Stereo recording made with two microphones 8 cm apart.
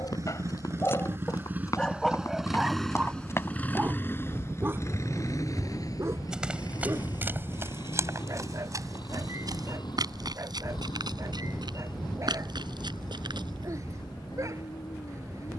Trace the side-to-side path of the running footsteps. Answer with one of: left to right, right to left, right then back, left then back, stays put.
left to right.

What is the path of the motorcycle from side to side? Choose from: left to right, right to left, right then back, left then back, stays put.
right to left.